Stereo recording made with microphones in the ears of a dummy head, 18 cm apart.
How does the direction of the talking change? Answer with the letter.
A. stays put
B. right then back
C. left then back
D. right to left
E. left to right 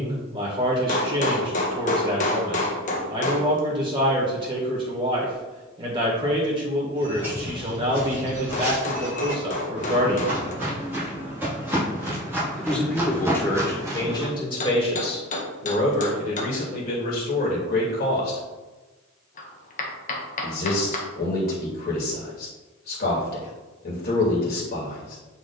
D.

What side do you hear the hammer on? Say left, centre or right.
left.